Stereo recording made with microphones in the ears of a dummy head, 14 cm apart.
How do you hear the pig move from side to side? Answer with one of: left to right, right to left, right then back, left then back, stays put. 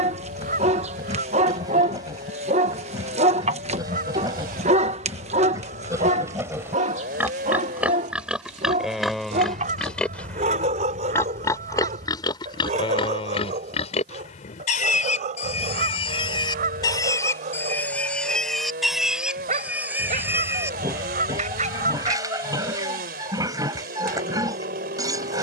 left then back.